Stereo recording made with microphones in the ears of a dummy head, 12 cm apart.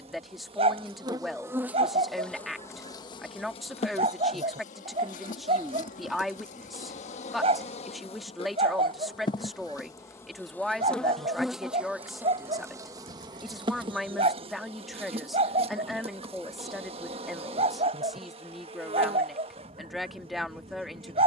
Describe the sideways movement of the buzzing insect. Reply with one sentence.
In this clip you hear the buzzing insect move from right to left and back again.